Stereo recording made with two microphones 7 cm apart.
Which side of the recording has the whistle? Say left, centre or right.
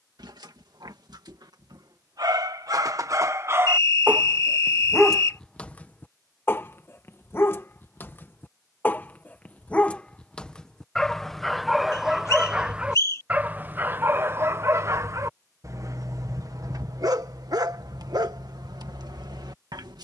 left.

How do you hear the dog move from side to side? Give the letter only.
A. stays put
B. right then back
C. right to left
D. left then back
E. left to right
D.